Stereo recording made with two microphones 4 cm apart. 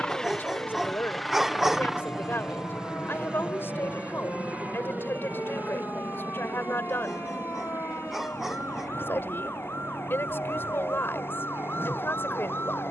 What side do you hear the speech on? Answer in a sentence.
You can hear the speech on the left.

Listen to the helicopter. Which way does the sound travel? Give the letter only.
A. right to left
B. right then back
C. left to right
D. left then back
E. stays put
C.